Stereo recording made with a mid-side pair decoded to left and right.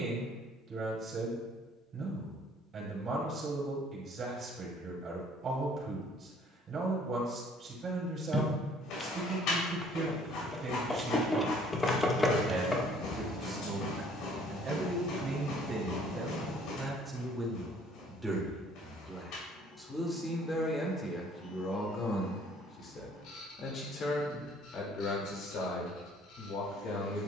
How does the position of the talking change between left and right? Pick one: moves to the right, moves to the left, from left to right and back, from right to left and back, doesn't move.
moves to the left.